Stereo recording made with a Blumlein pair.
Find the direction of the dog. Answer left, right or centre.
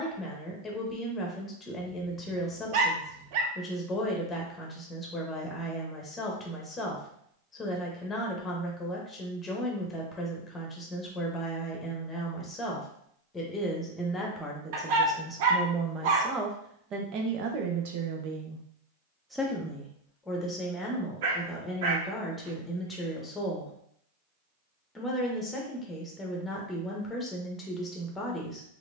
right.